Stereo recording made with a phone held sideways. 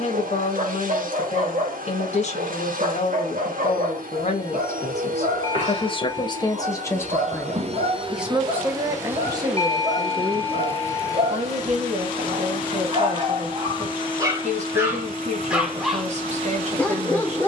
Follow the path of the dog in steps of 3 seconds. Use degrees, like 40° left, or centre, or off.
50° right, 50° right, 50° right, 50° right, 30° right, 10° left.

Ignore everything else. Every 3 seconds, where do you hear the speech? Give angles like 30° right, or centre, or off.
50° left, 50° left, 10° left, 40° right, 50° right, 50° right.